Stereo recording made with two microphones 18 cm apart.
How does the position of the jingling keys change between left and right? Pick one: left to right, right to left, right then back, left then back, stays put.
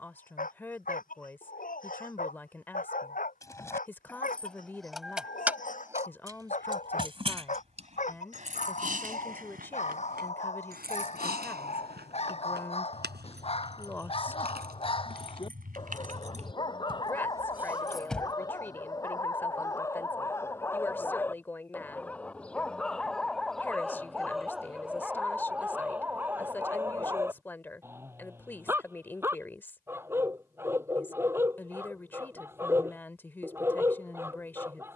right then back.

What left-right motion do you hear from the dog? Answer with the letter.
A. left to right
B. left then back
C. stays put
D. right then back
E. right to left
A.